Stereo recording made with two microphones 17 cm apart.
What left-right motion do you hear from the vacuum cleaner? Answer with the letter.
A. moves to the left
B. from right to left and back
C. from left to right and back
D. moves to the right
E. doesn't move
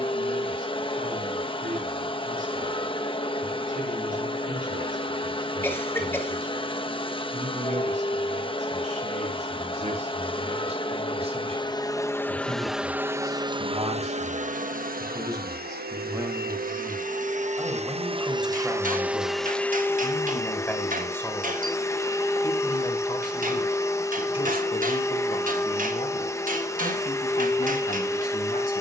C.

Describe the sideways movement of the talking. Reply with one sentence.
In this clip you hear the talking move to the left.